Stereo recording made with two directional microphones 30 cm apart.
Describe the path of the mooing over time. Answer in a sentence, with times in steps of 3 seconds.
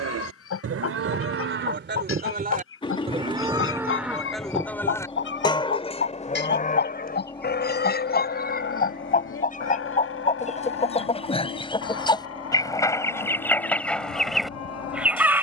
You can hear the mooing on the right from 0 s, in the centre from 3 s and on the left from 6 s.